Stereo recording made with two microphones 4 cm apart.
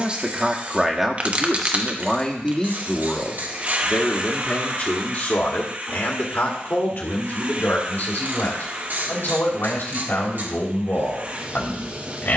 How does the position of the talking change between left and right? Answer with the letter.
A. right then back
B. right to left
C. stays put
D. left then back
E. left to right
B.